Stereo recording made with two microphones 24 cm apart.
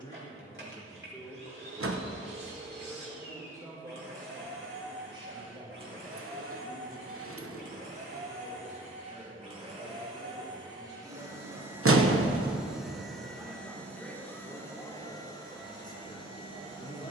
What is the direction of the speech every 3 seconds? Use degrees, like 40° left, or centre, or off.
10° left, 20° right, 30° right, 30° right, centre, 20° left.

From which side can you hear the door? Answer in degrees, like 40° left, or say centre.
60° right.